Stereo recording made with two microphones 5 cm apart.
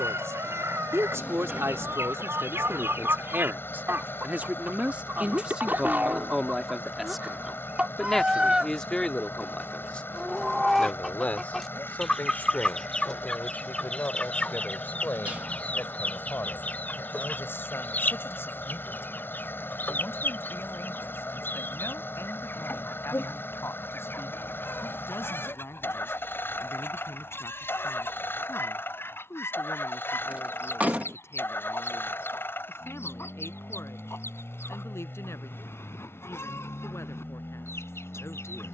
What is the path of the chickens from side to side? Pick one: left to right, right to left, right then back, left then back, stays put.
right to left.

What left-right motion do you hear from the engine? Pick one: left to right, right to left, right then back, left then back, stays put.
stays put.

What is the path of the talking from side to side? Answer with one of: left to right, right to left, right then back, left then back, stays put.
right to left.